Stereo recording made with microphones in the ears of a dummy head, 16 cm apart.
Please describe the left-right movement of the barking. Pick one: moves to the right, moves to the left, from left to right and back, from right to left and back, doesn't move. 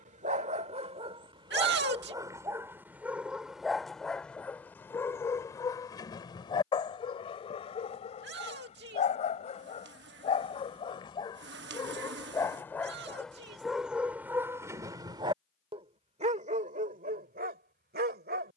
from right to left and back.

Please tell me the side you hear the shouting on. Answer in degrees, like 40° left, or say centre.
60° right.